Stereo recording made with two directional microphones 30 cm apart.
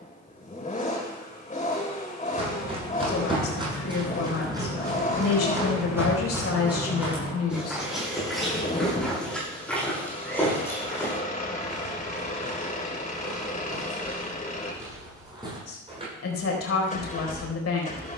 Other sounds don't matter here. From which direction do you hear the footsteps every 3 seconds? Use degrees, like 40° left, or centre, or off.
20° right, 10° right, centre, 10° left, centre, 10° right.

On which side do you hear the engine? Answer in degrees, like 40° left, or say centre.
20° left.